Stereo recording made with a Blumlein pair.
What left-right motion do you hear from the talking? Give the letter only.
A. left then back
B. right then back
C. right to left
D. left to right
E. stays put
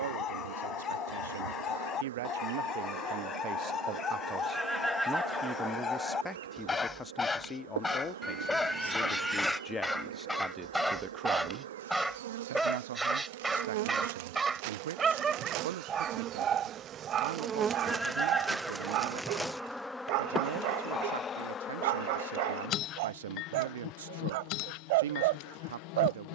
A.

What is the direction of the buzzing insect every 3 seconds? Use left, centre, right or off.
right, right, right, right, right, right, centre, left, left.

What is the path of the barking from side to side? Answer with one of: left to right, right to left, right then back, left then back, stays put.
left to right.